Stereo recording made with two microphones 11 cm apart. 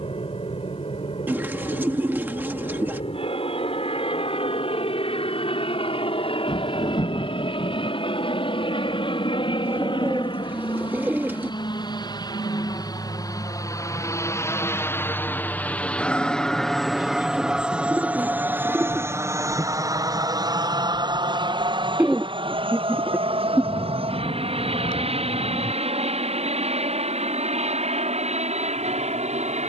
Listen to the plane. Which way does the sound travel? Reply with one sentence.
You can hear the plane travel towards the right.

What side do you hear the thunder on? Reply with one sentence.
In this clip you hear the thunder on the left.